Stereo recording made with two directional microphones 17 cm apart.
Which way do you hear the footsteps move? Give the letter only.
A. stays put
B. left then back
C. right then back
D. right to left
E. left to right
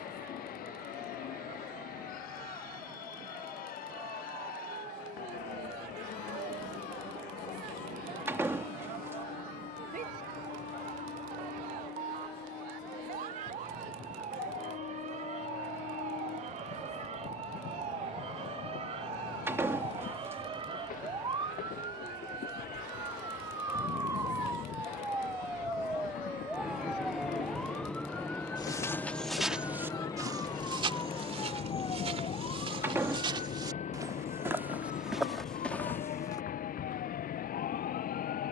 C.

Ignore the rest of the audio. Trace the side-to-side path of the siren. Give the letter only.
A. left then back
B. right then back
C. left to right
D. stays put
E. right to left
E.